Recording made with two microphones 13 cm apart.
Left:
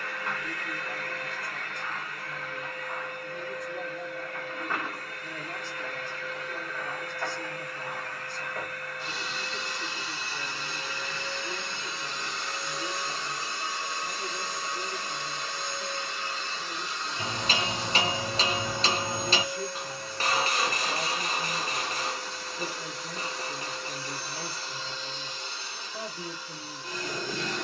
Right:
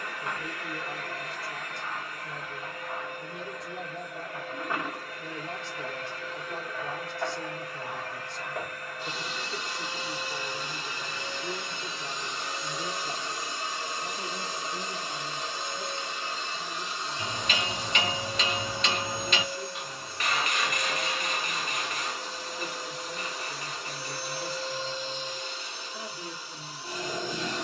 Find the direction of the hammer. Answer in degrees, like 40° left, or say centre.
30° left.